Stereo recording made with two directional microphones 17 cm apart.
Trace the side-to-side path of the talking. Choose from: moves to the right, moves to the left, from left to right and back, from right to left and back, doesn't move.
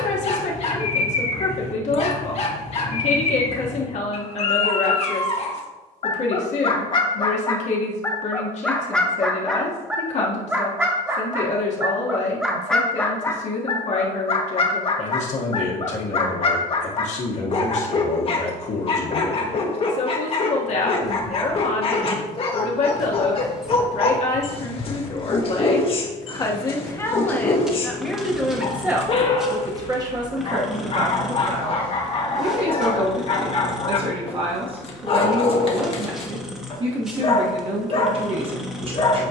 moves to the right.